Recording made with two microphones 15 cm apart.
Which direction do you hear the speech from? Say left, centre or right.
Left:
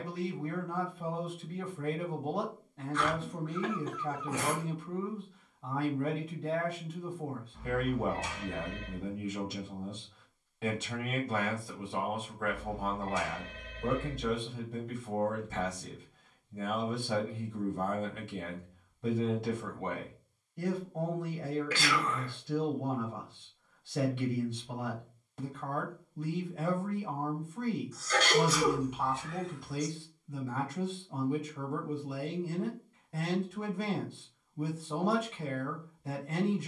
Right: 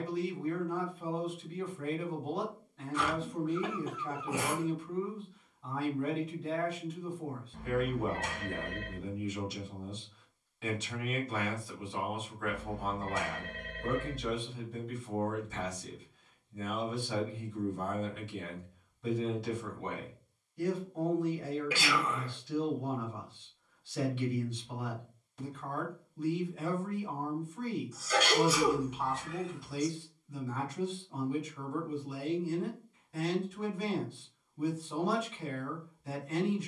left.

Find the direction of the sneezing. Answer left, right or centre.
centre.